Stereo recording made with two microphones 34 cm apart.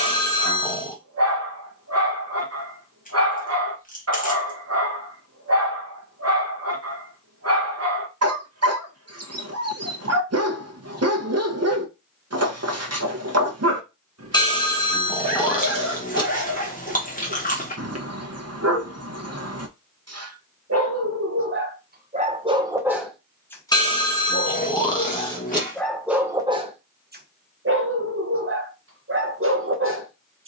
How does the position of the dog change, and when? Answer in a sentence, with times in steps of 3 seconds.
You can hear the dog on the right from 0 s, in the centre from 24 s and on the right from 27 s.